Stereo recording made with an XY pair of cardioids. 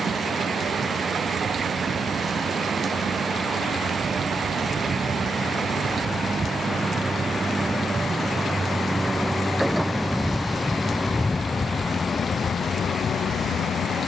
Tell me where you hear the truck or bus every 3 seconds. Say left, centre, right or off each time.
right, right, right, centre, left.